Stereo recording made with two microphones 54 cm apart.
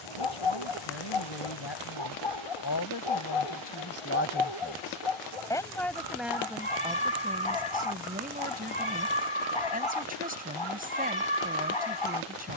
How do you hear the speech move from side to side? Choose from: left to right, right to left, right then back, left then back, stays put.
left to right.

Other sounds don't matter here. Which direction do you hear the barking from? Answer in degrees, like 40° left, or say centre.
70° left.